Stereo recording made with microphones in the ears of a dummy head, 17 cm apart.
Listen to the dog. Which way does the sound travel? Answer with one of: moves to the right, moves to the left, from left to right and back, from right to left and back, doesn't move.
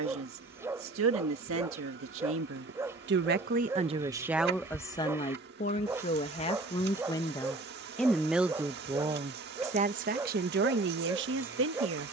doesn't move.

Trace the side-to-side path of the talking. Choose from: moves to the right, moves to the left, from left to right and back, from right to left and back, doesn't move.
from right to left and back.